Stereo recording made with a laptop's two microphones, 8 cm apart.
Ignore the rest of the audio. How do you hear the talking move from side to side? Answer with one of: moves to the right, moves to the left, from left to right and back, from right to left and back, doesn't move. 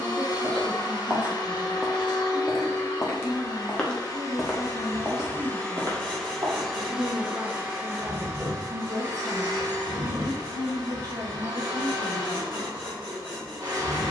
doesn't move.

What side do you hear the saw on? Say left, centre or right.
right.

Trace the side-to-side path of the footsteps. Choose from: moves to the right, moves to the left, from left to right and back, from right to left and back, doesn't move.
from right to left and back.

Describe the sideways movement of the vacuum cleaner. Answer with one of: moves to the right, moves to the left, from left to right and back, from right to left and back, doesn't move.
moves to the right.